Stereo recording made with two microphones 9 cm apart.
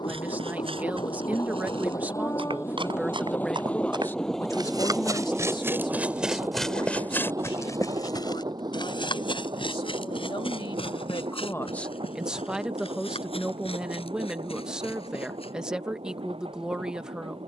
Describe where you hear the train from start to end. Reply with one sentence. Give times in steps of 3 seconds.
You can hear the train on the left from 0 s, in the centre from 3 s and on the right from 6 s.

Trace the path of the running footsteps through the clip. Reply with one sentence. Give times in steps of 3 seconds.
In this clip you hear the running footsteps on the right from 0 s and on the left from 6 s.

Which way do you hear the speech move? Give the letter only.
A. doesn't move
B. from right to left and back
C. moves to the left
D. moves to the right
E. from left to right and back
B.